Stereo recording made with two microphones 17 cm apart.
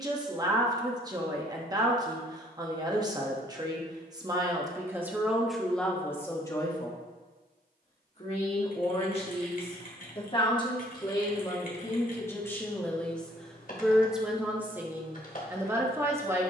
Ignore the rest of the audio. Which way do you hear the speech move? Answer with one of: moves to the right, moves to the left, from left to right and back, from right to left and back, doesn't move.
from right to left and back.